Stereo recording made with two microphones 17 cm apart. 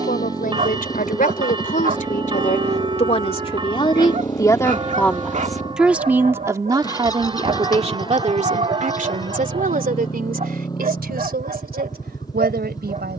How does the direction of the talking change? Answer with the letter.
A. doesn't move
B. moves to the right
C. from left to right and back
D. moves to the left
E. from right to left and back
B.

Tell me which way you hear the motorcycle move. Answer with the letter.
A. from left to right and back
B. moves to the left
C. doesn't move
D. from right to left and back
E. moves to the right
C.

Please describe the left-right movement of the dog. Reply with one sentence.
You can hear the dog stay in one place.